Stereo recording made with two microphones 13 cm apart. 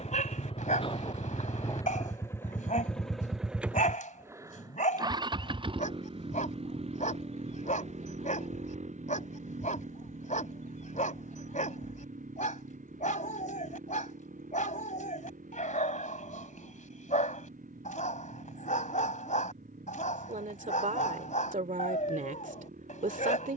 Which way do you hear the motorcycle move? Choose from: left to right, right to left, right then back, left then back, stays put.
left to right.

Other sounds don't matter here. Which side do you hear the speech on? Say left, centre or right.
right.